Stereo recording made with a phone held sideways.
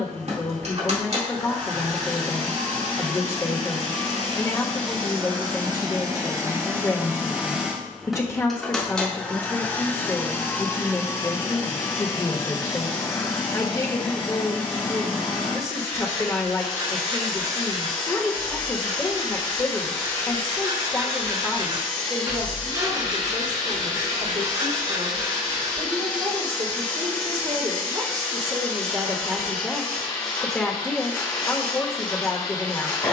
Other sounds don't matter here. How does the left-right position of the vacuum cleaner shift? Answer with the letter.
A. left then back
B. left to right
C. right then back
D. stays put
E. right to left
E.